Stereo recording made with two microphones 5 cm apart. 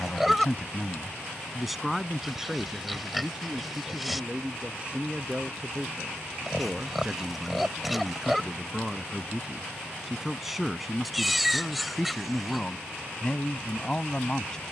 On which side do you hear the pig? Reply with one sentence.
You can hear the pig in the centre.